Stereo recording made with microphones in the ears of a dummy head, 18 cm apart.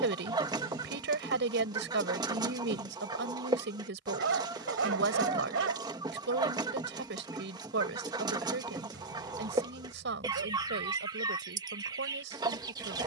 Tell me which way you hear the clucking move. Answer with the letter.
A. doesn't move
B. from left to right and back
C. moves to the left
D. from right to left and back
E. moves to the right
A.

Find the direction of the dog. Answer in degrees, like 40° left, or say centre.
70° right.